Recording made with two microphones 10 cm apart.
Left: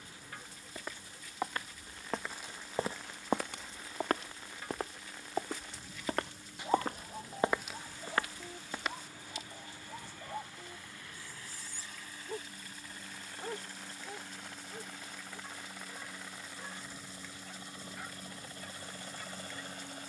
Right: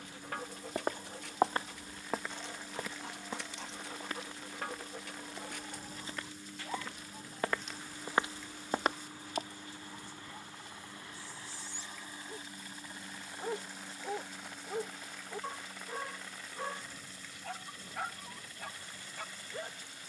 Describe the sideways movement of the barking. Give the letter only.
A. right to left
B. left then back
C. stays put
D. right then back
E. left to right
B.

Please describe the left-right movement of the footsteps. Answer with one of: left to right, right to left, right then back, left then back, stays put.
left then back.